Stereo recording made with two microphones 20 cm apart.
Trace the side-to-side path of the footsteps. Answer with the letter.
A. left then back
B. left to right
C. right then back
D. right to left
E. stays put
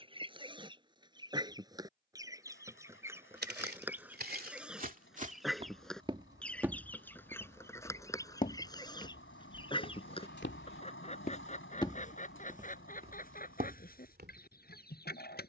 A.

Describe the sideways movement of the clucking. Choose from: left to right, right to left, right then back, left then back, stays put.
right to left.